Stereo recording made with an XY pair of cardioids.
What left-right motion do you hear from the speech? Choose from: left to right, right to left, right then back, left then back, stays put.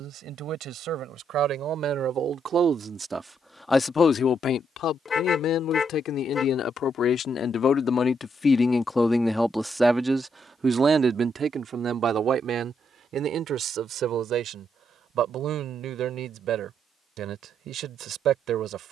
left then back.